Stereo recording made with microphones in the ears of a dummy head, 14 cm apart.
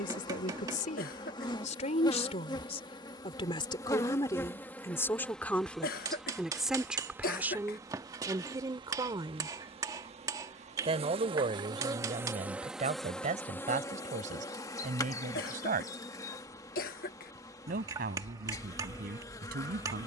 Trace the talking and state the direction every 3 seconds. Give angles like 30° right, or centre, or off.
50° left, 20° left, 10° right, 30° right, 50° right, 50° right, 60° right.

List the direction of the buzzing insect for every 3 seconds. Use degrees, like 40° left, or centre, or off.
30° left, 10° left, 20° right, 30° right, 10° left, 20° left, 20° left.